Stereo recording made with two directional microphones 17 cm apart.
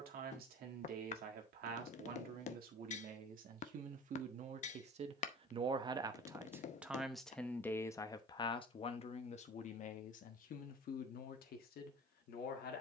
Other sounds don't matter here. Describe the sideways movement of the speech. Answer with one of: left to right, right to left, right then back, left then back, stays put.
right to left.